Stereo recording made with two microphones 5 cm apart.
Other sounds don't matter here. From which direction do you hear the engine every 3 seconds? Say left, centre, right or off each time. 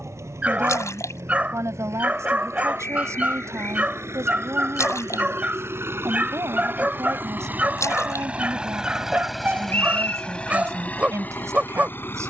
right, right, right, left.